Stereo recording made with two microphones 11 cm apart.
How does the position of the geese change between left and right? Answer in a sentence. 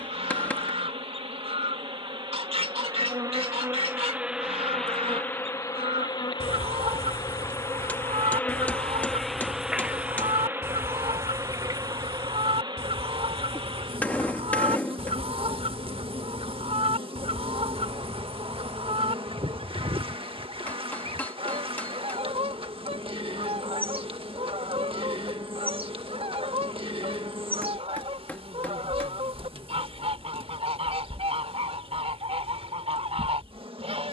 You can hear the geese stay put.